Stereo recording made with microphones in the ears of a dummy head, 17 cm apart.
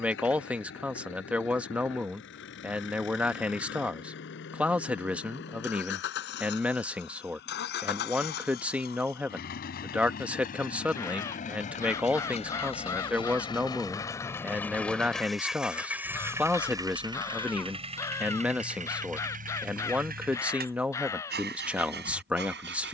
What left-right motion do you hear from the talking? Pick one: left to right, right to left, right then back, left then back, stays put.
stays put.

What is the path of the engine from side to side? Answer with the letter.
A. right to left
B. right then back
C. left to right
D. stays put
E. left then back
C.